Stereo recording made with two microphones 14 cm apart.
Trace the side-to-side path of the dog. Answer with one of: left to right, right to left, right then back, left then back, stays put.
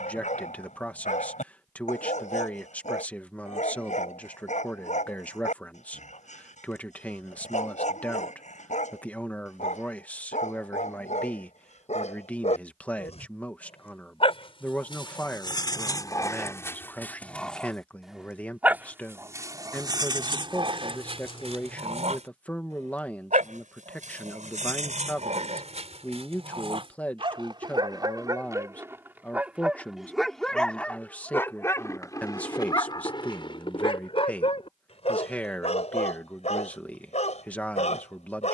right then back.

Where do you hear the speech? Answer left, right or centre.
centre.